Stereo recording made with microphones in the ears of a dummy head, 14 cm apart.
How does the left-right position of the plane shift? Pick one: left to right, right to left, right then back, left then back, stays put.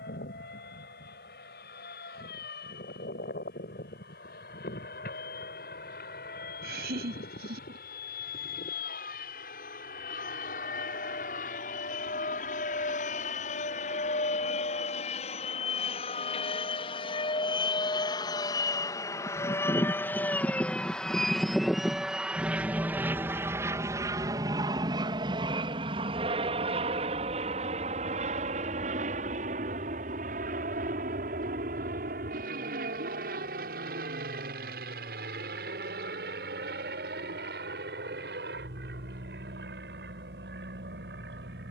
left to right.